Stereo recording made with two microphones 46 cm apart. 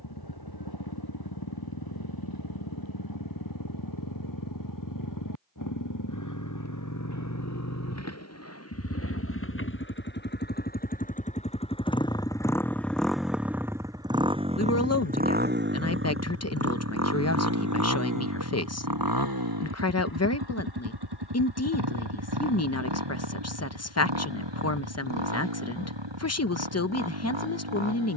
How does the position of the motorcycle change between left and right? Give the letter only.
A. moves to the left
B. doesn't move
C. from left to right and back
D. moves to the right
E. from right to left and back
D.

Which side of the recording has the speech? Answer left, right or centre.
left.